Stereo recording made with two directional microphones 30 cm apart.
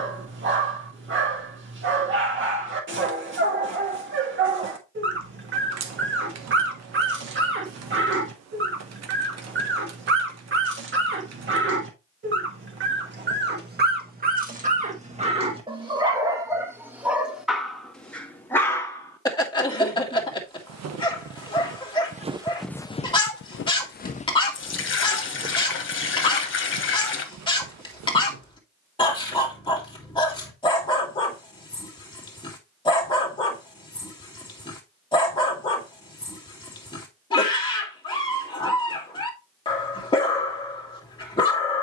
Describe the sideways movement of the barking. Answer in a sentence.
You can hear the barking move to the left.